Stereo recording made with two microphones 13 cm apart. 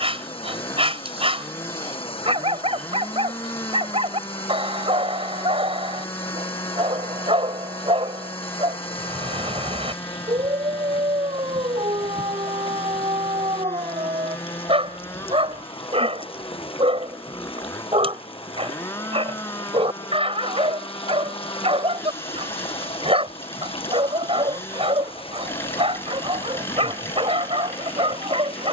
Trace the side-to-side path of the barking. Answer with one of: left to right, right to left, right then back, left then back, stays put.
stays put.